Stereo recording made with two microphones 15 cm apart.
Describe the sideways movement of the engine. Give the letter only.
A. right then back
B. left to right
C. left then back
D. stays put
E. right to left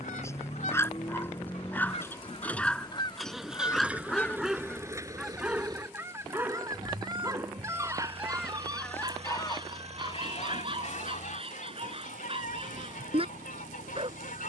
B.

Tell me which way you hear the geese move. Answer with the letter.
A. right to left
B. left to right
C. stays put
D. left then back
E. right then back
E.